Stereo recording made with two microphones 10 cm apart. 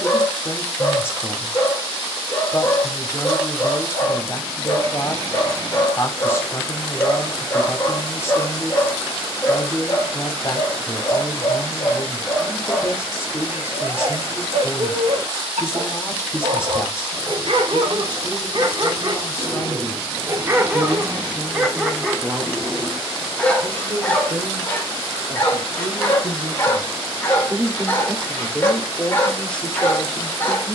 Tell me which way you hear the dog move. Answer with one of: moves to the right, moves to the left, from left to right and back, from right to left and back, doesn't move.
from left to right and back.